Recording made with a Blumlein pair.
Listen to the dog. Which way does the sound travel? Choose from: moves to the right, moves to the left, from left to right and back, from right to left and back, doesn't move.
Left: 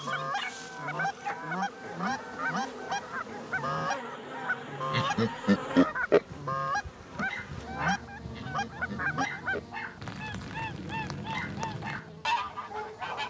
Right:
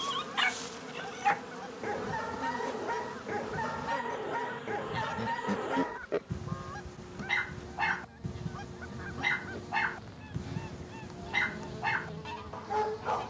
doesn't move.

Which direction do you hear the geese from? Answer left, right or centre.
left.